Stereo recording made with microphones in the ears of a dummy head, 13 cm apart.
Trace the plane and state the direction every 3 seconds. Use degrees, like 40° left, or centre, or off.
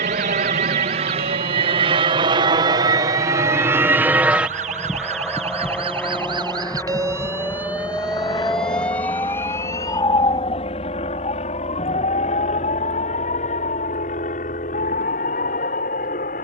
40° right, 10° right, 20° left, 40° left, 50° left, 50° left.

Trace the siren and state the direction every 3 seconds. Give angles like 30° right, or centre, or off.
70° right, 50° right, 10° right, 20° left, 50° left, 60° left.